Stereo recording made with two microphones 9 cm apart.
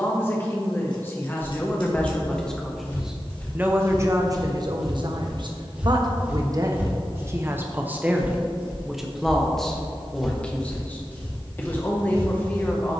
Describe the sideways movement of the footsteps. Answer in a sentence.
You can hear the footsteps move from left to right and back again.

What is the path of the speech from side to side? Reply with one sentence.
You can hear the speech move from left to right and back again.